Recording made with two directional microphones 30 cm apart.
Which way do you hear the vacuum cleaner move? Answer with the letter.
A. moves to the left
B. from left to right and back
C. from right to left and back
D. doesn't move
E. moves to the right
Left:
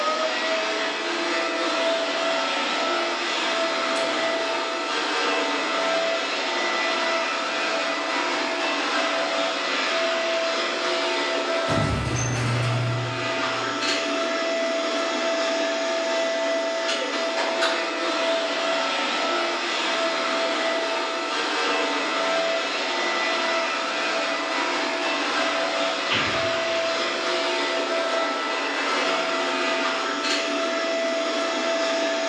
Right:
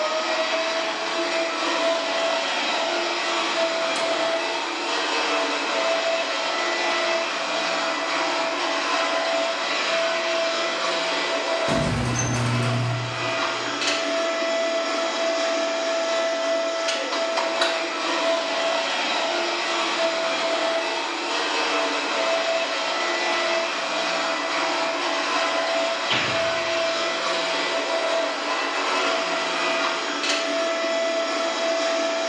D.